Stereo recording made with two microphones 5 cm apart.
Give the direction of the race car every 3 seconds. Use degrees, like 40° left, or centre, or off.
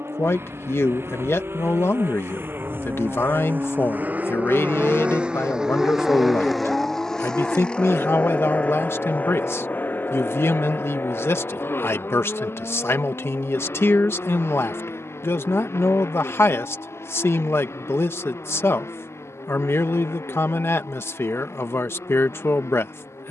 60° right, 30° right, 10° left, 50° left, 60° left, 60° left, 70° left, 70° left.